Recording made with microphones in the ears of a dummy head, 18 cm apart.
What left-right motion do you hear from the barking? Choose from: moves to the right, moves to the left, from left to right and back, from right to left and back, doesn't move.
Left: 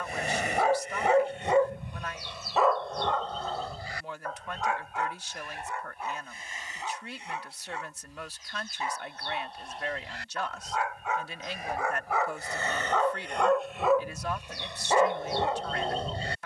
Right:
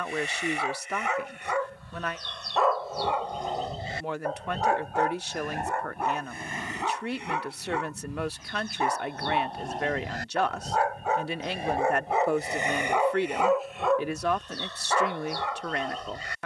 from left to right and back.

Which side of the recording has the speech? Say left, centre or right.
right.